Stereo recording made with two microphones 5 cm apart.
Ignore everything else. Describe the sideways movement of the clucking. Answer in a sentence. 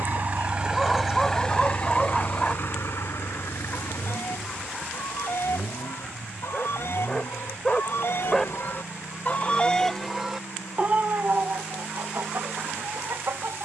You can hear the clucking go from the left side to the right.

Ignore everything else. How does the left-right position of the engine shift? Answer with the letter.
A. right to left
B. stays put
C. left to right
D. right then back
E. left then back
A.